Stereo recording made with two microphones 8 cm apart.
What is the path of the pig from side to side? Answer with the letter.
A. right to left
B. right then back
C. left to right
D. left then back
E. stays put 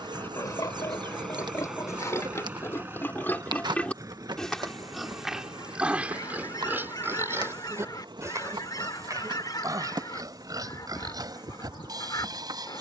C.